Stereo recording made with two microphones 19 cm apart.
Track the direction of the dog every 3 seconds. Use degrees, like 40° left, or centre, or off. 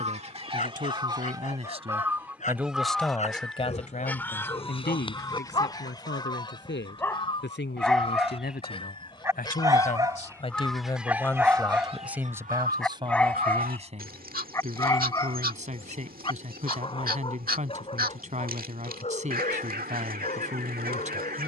40° left, 30° left, 10° left, 10° right, 10° left, 30° left, 40° left.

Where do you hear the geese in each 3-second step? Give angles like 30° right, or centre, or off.
20° right, 10° left, 30° left, centre, 50° right, 50° right, 50° right.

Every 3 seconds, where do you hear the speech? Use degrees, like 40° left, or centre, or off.
30° right, 50° left, 70° left, 30° left, 30° right, 40° right, 40° right.